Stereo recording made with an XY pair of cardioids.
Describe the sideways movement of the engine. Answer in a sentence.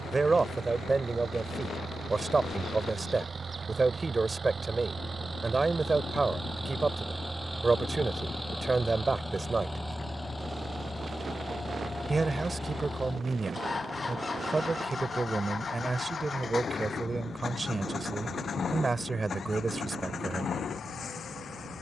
In this clip you hear the engine move from right to left.